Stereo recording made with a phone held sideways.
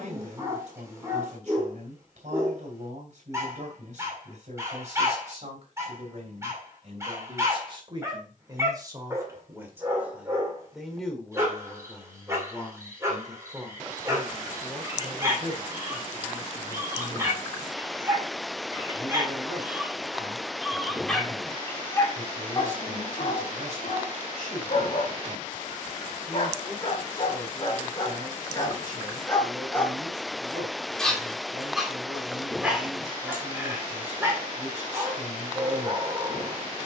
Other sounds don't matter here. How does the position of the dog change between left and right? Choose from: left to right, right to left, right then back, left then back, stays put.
left then back.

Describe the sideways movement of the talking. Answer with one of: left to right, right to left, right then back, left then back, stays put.
left then back.